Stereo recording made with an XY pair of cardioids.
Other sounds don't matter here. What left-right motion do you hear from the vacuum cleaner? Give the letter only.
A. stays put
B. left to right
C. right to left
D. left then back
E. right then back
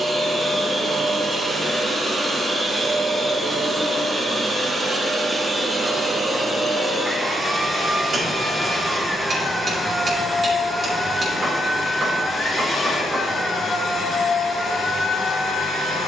C.